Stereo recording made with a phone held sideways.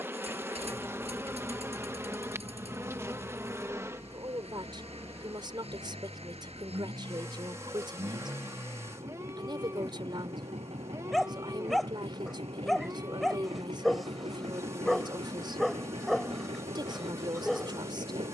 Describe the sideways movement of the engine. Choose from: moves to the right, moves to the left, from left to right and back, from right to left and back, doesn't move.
doesn't move.